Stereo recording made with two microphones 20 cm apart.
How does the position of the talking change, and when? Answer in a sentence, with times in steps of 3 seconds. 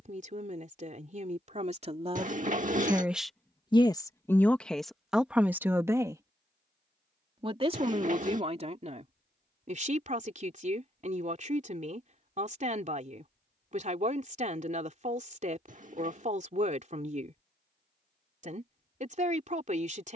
In this clip you hear the talking on the right from 0 s, in the centre from 3 s and on the right from 6 s.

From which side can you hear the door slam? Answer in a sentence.
You can hear the door slam on the right.